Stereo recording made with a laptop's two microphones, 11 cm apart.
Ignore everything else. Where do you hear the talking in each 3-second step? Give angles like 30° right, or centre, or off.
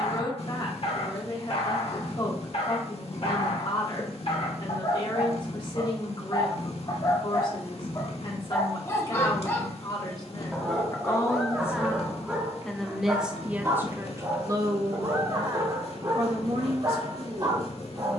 50° left, 50° left, 50° left, 30° left, 10° right, 60° right.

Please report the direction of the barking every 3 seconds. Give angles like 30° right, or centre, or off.
60° left, 60° left, 40° left, 10° left, 20° right, 40° right.